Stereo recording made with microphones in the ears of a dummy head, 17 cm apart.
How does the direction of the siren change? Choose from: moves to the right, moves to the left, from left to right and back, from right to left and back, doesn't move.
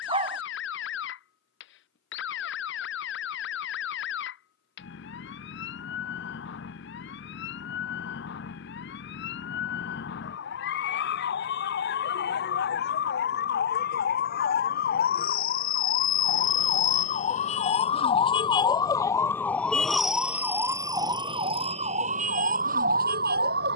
moves to the right.